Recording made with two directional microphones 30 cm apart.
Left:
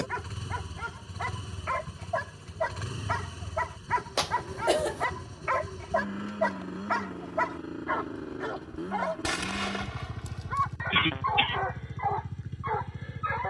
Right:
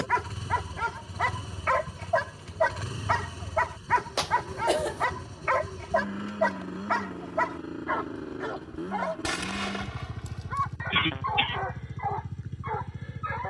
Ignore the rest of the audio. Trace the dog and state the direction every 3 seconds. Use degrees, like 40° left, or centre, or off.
50° right, 30° right, 10° right, 10° left, 20° left.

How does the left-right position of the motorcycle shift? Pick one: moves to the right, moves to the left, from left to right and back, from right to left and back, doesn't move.
doesn't move.